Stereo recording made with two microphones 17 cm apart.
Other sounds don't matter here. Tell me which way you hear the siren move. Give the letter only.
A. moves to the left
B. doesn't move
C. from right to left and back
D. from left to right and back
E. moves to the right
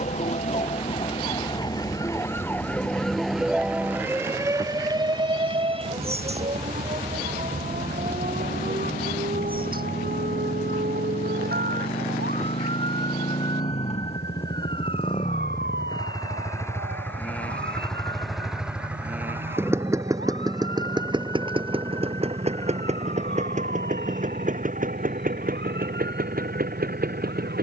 E.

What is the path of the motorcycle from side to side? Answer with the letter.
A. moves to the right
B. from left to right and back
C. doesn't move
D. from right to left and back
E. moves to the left
A.